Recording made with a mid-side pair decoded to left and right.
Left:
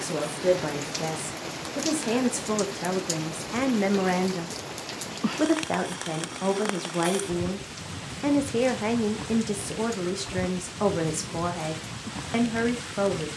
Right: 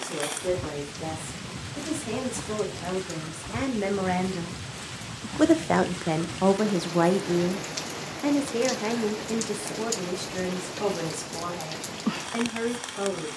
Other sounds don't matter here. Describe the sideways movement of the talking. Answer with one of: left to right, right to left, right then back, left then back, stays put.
right then back.